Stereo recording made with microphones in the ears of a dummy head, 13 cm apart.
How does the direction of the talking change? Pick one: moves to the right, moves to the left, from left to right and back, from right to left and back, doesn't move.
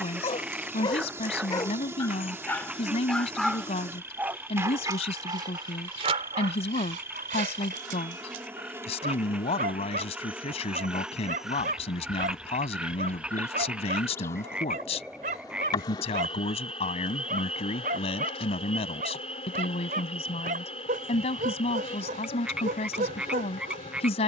doesn't move.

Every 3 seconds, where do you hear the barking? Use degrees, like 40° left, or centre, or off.
20° left, 20° right, 50° right, 60° right, 60° right, 60° right, 60° right, 60° right.